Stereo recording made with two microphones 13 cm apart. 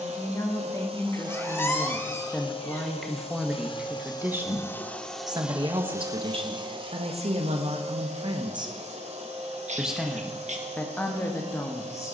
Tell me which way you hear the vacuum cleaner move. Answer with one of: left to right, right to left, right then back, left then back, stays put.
left then back.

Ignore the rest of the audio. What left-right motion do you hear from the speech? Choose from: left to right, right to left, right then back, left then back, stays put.
right then back.